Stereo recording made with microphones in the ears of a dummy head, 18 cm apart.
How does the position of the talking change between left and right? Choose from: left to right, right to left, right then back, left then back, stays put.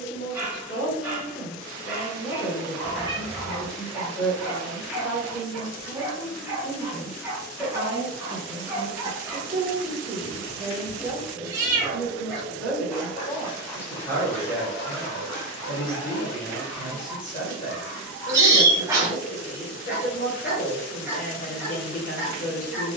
right then back.